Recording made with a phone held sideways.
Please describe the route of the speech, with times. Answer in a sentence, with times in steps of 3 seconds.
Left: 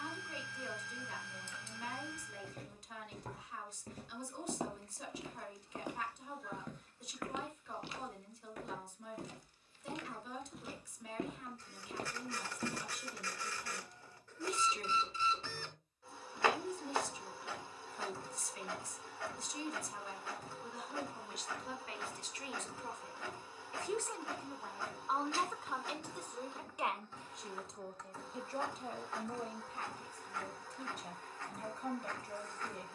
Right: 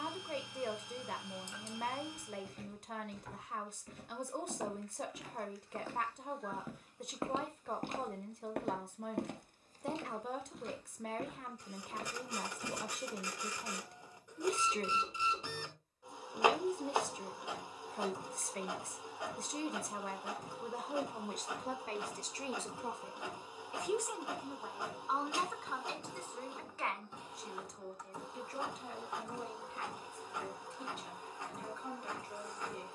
You can hear the speech on the right from 0 s, in the centre from 24 s and on the left from 27 s.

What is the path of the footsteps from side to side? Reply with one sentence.
You can hear the footsteps go right and come back.